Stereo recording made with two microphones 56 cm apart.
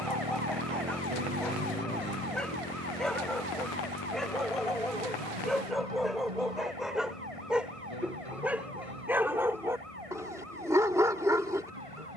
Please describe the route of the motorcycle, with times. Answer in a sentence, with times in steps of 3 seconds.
You can hear the motorcycle in the centre from 0 s and on the left from 3 s.